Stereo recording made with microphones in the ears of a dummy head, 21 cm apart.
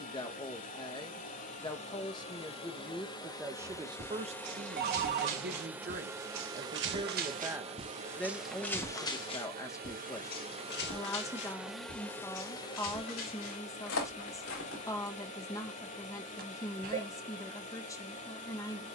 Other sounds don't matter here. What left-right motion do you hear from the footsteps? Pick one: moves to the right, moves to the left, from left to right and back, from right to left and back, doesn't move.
moves to the left.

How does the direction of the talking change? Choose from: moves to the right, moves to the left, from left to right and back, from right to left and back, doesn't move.
from left to right and back.